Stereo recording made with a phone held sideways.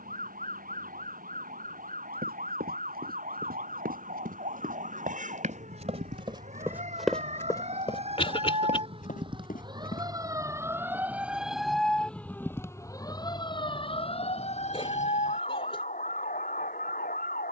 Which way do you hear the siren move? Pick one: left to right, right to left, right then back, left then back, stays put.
right to left.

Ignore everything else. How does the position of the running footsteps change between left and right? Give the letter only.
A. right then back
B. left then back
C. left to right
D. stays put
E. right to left
E.